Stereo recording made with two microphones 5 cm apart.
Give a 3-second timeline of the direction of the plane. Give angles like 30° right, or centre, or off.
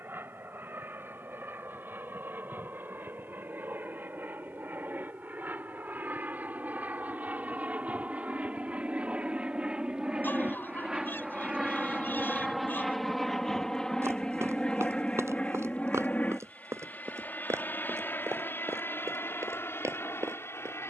60° right, 50° right, 40° right, 20° right, 10° left, 30° left, 50° left.